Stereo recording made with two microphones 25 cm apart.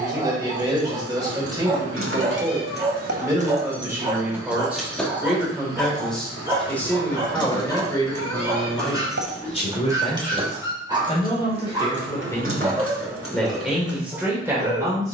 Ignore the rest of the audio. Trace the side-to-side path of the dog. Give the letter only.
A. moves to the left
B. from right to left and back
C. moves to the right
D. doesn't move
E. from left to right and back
D.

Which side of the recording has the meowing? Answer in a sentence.
You can hear the meowing on the right.